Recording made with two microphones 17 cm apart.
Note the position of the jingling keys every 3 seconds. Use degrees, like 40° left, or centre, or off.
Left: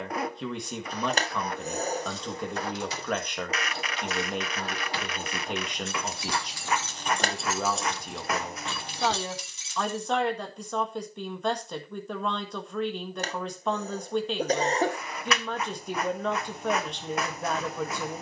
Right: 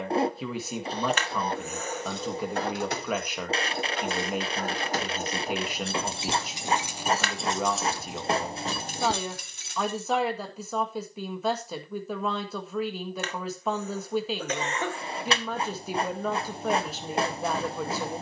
60° right, 50° right, 20° right, 50° right, off, off.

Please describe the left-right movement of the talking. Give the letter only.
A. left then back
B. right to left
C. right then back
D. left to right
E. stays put
E.